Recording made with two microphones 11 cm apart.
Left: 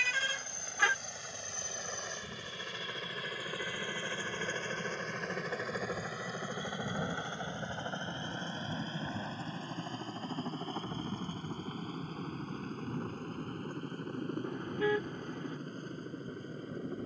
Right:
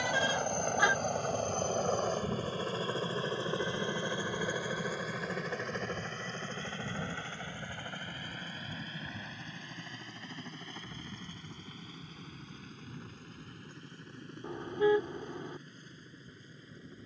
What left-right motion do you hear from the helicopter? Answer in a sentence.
In this clip you hear the helicopter travel towards the left.